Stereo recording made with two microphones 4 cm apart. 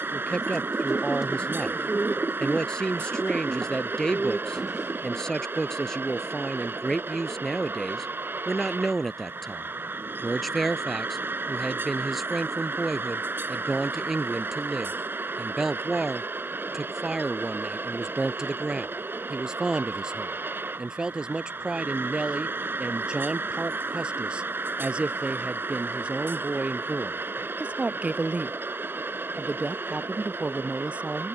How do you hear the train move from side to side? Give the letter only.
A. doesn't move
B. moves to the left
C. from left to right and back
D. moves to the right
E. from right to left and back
A.